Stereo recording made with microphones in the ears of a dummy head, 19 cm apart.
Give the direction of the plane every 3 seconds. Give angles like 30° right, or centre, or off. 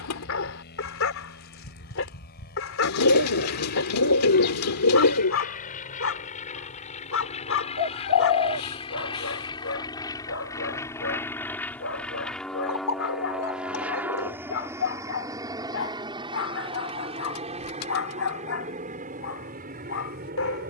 50° left, 50° left, 30° left, 20° left, centre, 20° right, 40° right.